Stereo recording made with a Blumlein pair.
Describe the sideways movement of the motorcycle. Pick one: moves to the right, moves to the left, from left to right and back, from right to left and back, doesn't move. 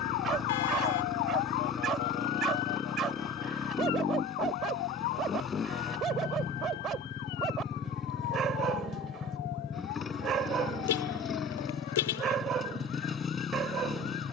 doesn't move.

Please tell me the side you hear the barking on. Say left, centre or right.
right.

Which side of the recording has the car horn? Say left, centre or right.
left.